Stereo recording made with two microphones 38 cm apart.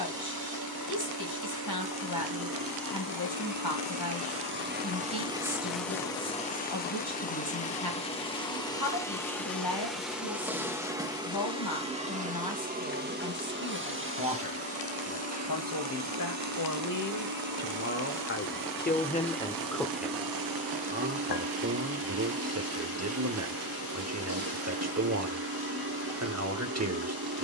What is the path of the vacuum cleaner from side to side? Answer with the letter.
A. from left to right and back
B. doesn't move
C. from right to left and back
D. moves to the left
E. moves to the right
C.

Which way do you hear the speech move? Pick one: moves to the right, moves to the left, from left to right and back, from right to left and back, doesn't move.
moves to the right.